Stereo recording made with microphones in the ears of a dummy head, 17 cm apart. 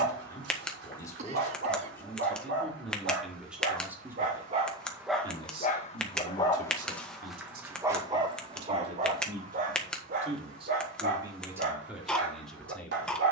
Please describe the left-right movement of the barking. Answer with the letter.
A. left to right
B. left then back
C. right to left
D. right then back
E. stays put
B.